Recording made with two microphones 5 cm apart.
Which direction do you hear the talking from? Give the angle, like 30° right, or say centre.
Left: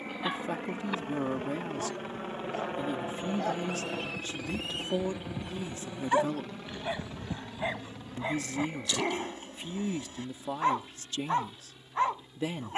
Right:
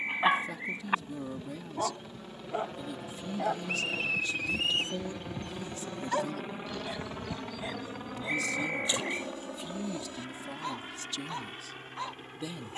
40° left.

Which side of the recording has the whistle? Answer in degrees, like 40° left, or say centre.
60° right.